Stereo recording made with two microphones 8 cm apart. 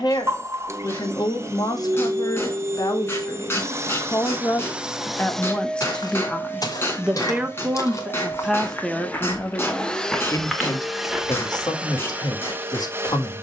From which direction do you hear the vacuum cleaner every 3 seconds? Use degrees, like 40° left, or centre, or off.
40° right, 20° right, 30° left, centre, 30° right.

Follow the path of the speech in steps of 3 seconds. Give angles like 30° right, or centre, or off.
60° left, 30° left, centre, 40° left, 60° left.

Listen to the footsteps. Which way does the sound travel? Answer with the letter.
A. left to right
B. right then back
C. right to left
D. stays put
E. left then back
A.